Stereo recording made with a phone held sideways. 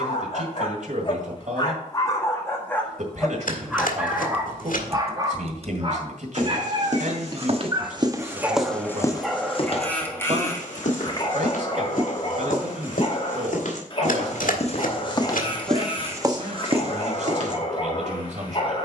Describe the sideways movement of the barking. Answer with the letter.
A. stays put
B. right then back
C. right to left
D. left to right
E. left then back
B.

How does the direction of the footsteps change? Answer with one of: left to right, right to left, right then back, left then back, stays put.
left then back.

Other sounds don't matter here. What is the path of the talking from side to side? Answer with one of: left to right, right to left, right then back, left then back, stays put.
stays put.